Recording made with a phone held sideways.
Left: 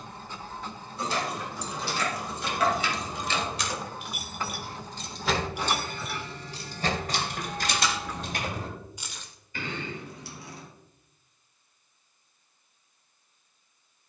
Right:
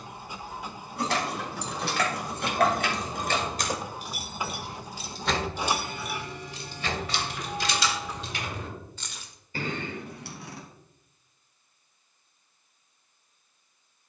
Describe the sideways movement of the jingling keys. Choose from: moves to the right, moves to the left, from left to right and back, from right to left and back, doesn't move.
from right to left and back.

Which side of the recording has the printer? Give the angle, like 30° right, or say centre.
10° right.